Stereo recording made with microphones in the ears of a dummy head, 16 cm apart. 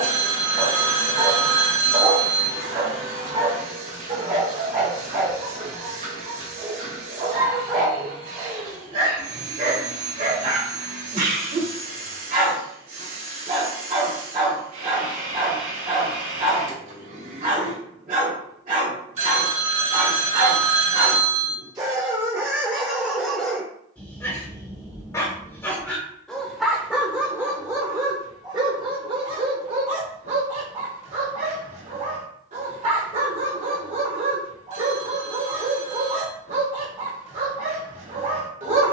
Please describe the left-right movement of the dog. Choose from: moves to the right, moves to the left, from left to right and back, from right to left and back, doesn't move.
from right to left and back.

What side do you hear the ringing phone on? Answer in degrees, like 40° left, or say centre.
40° right.